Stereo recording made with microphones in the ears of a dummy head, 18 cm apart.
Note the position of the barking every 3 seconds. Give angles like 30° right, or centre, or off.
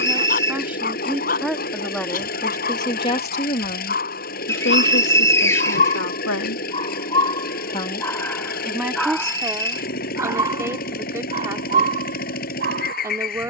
40° left, 40° left, 20° left, 20° right, 40° right.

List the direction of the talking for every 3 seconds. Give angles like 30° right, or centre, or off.
centre, 60° left, 40° left, 10° right, 10° right.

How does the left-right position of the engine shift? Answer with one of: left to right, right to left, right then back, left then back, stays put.
stays put.